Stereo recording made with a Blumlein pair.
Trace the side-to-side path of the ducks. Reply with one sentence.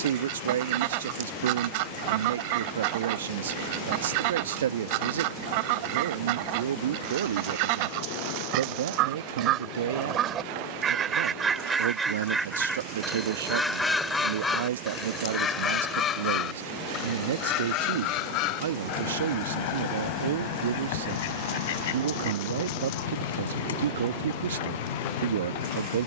You can hear the ducks go from the right side to the left.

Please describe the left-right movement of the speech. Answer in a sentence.
You can hear the speech stay put.